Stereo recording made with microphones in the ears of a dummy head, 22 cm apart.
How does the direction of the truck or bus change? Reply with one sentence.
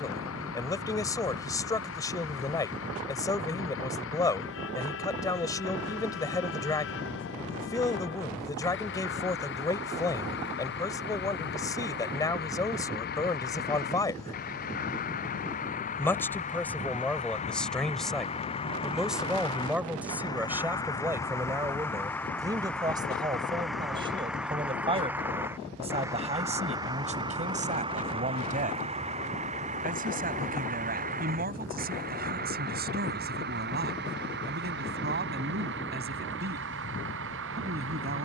In this clip you hear the truck or bus go from the left side to the right.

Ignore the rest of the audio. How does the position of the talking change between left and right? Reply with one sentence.
In this clip you hear the talking travel towards the right.